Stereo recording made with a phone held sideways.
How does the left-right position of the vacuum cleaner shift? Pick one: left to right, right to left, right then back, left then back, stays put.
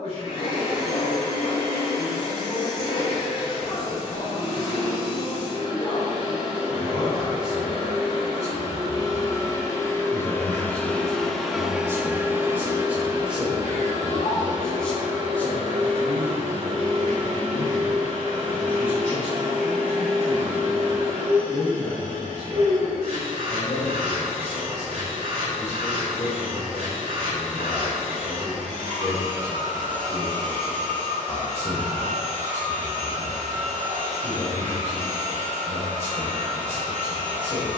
left to right.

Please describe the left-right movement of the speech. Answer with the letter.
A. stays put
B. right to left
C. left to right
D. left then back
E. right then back
E.